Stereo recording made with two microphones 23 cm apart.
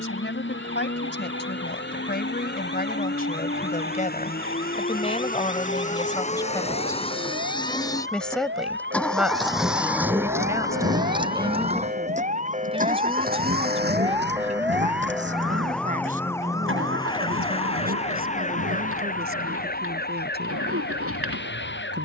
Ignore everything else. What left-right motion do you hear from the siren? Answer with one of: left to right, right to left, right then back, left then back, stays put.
right to left.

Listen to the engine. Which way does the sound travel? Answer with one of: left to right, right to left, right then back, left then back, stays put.
left to right.